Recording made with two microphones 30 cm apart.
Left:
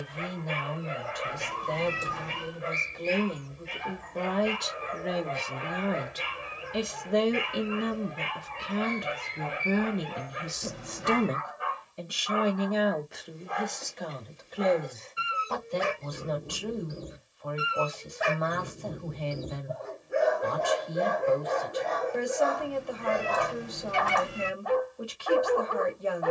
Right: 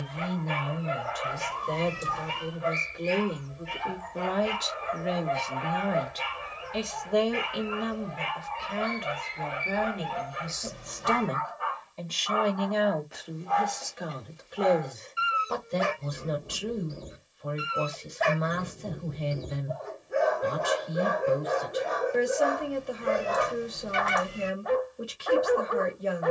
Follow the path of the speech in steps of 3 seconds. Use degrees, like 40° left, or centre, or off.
20° right, centre, 30° left, 40° left, centre, 20° right, 20° right, 20° right, 20° right.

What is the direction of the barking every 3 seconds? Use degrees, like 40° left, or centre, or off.
20° left, 20° left, 20° left, 20° left, 20° left, 10° left, centre, 10° right, 20° right.